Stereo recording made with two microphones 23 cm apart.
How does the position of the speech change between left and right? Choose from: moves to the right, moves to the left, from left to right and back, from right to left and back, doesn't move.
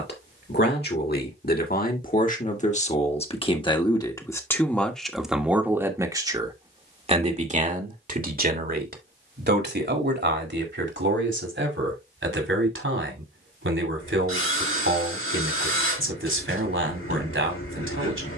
moves to the right.